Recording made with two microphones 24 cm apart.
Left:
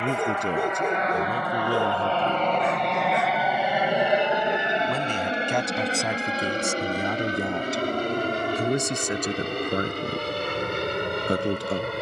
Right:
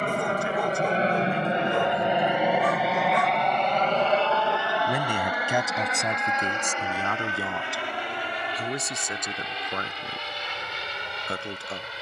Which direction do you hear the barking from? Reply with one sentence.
In this clip you hear the barking on the left.